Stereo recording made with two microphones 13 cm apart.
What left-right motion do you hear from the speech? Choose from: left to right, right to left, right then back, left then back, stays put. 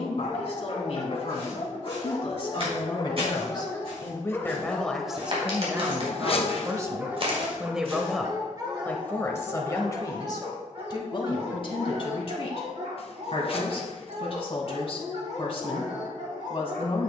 right then back.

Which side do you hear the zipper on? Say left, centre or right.
left.